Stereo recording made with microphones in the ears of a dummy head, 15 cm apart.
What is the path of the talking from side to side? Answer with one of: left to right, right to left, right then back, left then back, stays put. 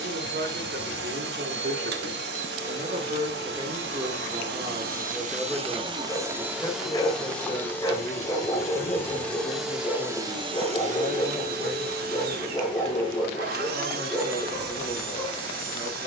right to left.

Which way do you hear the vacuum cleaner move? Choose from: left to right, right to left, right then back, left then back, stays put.
left then back.